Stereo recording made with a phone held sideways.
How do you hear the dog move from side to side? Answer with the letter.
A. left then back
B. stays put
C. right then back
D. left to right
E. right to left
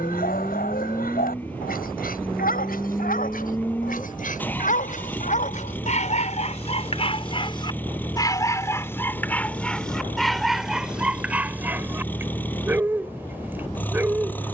D.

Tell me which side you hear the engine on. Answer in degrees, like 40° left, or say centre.
10° left.